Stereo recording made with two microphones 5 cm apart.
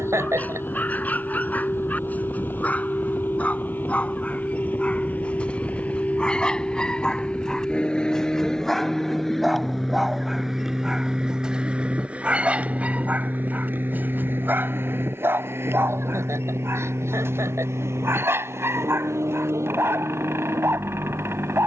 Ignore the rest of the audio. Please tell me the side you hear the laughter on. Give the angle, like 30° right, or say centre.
80° right.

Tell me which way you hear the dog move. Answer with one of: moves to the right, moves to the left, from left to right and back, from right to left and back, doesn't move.
moves to the right.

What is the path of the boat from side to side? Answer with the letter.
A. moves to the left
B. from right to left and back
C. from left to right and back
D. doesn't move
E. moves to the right
E.